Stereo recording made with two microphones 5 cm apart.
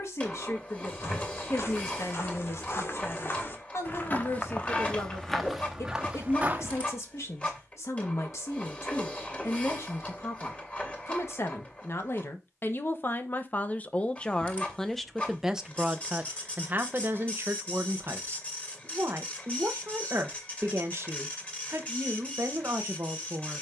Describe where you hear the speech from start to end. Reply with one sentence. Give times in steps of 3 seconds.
In this clip you hear the speech on the left from 0 s and on the right from 15 s.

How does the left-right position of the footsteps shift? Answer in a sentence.
In this clip you hear the footsteps move to the right.